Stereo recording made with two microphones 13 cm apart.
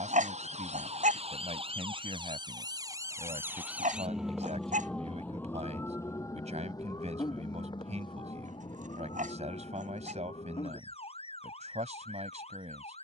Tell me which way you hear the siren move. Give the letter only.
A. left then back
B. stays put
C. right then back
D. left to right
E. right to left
E.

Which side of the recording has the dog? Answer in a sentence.
In this clip you hear the dog on the right.